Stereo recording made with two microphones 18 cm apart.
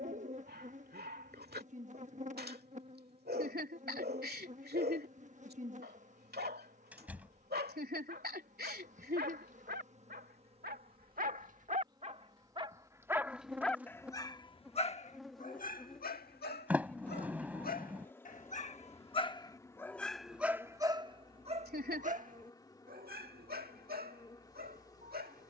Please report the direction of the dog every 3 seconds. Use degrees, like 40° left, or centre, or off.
60° right, 60° right, 60° right, 50° right, centre, 50° left, 20° left, 50° right, 60° right.